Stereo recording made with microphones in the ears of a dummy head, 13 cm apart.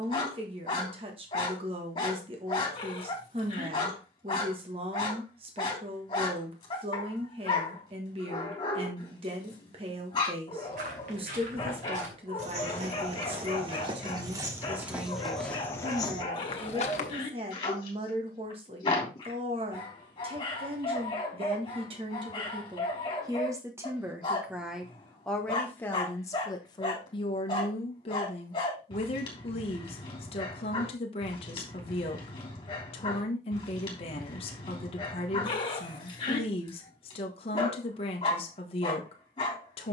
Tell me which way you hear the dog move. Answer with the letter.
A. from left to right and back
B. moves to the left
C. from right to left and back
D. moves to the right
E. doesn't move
E.